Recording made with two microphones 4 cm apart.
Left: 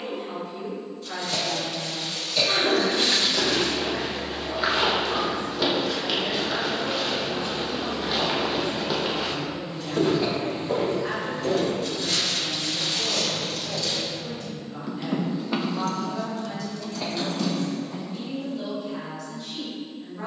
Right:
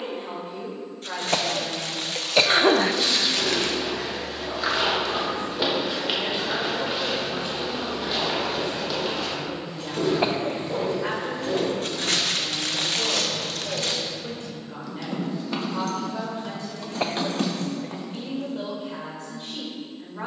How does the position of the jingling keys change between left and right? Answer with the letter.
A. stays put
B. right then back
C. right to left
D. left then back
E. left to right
D.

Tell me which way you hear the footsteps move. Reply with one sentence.
In this clip you hear the footsteps go right and come back.